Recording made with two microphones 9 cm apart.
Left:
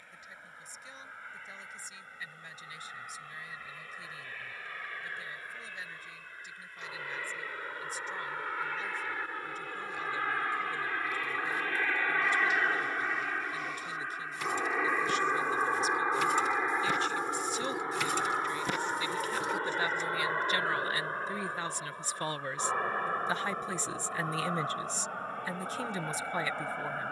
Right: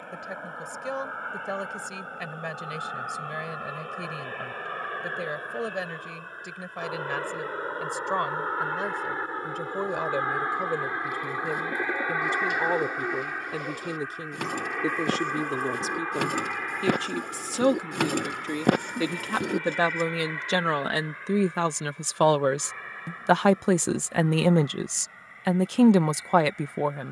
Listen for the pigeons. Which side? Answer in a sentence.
In this clip you hear the pigeons on the right.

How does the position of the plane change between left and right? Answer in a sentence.
You can hear the plane go from the right side to the left.